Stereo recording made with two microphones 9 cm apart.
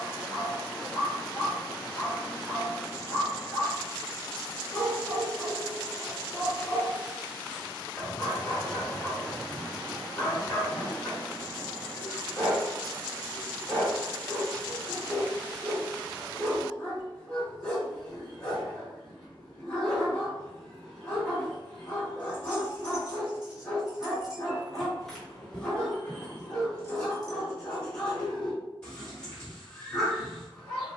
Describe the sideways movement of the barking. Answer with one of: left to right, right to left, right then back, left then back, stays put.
stays put.